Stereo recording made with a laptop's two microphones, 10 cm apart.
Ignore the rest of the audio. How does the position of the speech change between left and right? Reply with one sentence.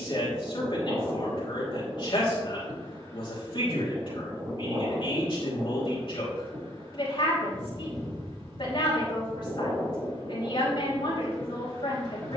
In this clip you hear the speech stay put.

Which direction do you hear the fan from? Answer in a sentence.
In this clip you hear the fan on the right.